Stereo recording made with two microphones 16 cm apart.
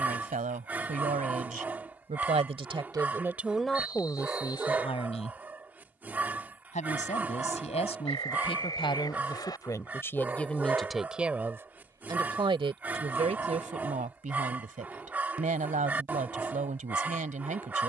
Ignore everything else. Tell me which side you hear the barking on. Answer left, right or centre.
centre.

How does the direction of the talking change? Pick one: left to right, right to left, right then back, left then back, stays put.
left then back.